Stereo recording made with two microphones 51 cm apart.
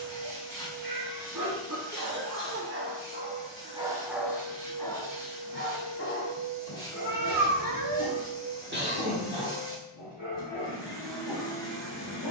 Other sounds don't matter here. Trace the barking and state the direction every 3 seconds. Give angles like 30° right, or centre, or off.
40° right, centre, 40° left, 60° left.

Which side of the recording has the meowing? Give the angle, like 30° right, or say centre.
40° right.